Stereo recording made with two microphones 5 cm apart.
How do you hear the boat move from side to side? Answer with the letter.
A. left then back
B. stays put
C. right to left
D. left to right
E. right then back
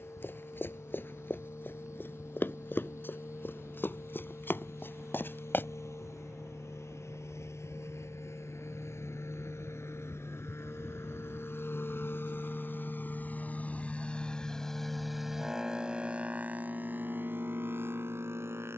D.